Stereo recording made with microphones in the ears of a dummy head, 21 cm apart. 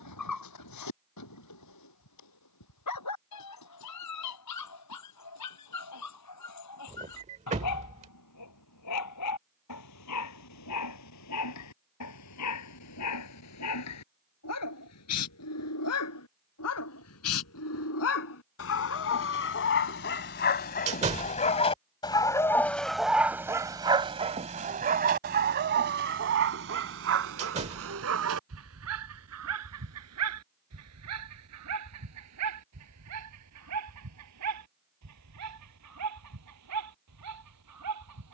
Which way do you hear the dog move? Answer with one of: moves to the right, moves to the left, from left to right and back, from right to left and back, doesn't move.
moves to the right.